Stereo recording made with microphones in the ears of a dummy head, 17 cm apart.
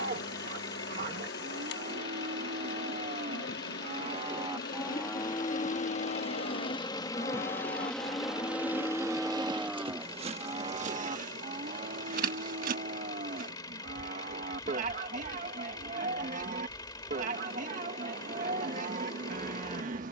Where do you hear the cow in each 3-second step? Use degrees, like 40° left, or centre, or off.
40° right, 10° right, 40° left, 20° right, 40° right, 40° right, 40° right.